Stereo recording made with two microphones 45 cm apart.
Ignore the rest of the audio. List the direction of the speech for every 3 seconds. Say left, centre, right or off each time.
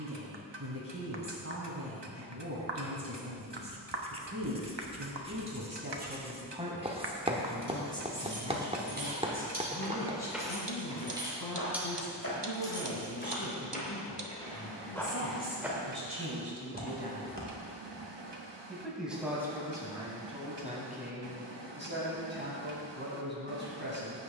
right, right, centre, left, left, left, centre, right.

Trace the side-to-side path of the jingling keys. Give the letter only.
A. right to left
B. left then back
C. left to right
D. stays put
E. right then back
A.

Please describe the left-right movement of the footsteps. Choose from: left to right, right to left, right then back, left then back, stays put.
left then back.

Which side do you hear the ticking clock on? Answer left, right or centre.
right.